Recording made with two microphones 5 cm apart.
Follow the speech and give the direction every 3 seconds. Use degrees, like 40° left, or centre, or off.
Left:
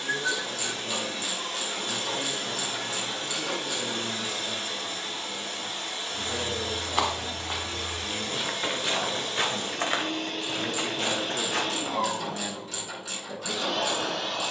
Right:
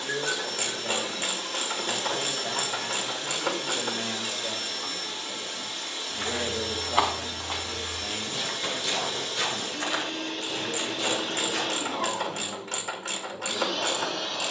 40° right, 40° right, 20° right, 30° left, 60° left.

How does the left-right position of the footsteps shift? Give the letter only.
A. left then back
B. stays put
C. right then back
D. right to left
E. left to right
D.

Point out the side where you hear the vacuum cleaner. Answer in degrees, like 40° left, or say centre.
40° left.